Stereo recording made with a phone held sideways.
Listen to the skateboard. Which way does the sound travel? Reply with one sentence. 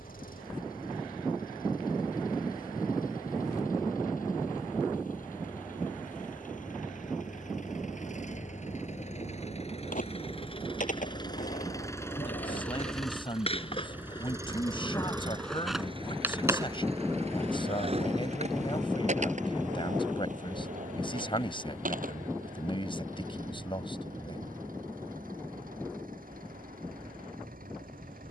You can hear the skateboard move from left to right.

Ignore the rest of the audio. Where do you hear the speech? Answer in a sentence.
In this clip you hear the speech on the left.